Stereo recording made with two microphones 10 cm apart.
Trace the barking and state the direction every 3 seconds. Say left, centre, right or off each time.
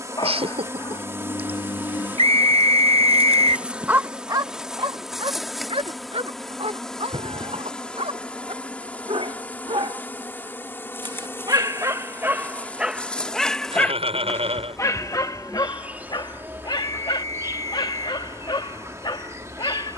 left, right, right, right, centre, left, left.